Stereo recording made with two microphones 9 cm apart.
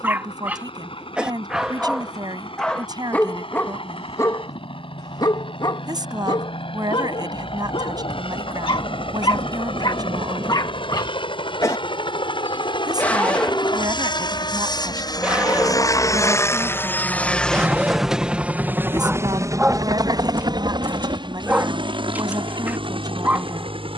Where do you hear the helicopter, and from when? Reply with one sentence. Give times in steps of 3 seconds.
In this clip you hear the helicopter on the left from 0 s and on the right from 18 s.